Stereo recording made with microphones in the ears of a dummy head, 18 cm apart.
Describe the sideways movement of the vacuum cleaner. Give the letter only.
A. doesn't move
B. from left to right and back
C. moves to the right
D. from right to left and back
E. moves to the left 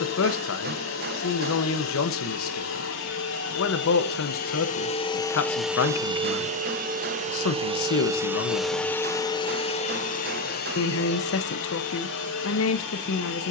B.